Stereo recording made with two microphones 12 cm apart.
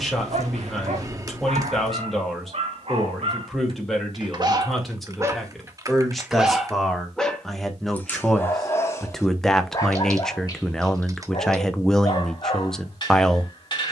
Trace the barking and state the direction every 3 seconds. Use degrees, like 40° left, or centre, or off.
60° right, 40° right, 10° left, 30° left, 40° left.